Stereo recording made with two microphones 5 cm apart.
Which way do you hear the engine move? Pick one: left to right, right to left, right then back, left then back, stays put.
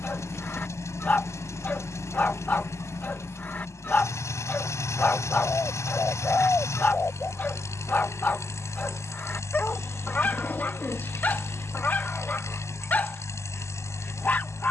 stays put.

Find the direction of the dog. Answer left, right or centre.
left.